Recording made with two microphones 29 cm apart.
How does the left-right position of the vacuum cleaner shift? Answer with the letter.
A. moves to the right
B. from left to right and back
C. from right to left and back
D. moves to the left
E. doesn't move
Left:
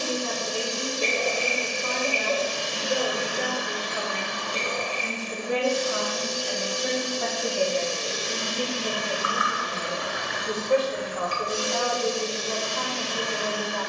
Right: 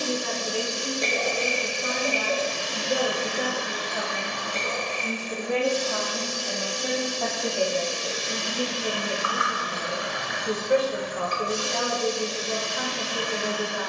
D.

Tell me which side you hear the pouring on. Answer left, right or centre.
left.